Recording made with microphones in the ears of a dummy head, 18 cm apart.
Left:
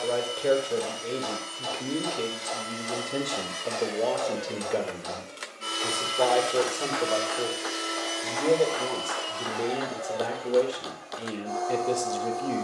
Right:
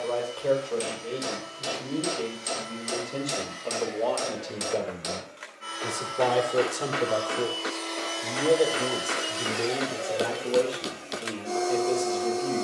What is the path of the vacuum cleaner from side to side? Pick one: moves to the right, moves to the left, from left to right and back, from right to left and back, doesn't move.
moves to the right.